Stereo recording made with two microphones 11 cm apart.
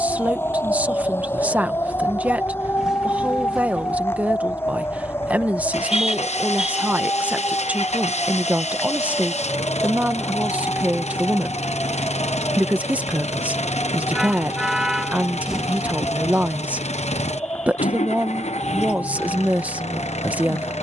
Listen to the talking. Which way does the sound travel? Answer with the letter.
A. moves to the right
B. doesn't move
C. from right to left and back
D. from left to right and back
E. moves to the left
B.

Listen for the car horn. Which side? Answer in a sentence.
In this clip you hear the car horn in the centre.